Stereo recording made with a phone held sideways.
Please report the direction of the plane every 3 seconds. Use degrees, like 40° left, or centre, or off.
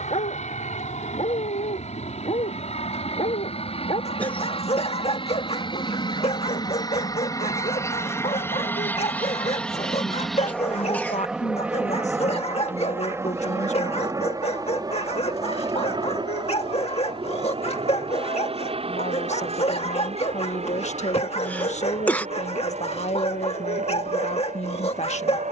60° left, 40° left, 20° left, centre, 20° right, 30° right, 40° right, 50° right, 50° right.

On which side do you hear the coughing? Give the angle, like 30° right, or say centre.
10° left.